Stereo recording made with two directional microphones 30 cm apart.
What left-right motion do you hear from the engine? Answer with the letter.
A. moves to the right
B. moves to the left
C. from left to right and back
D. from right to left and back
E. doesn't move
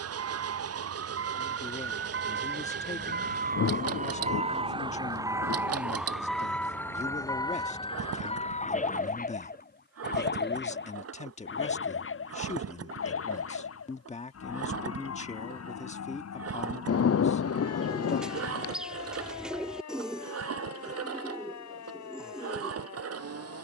E.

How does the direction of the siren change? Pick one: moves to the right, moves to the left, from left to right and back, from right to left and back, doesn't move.
moves to the left.